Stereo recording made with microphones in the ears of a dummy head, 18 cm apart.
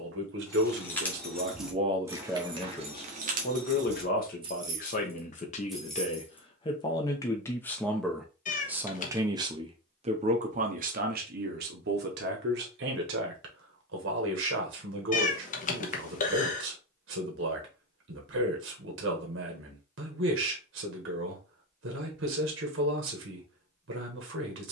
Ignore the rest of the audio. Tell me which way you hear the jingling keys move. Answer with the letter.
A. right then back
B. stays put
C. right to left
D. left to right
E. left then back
A.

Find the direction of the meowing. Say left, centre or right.
left.